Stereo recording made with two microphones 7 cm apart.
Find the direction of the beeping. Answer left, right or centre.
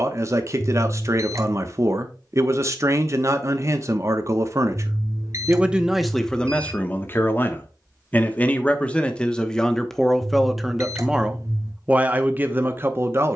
right.